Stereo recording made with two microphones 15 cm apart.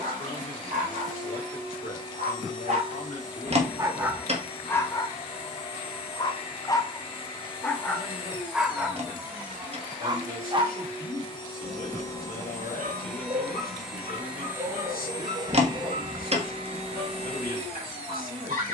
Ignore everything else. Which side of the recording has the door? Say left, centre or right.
right.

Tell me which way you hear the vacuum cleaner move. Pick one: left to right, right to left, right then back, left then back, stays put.
left to right.